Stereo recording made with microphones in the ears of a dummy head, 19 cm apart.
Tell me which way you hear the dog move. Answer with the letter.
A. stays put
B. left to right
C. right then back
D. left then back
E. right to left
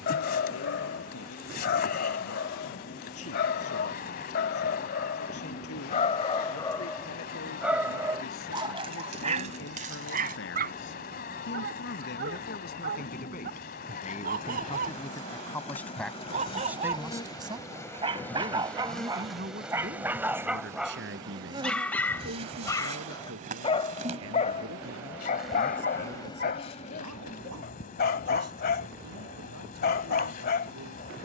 C.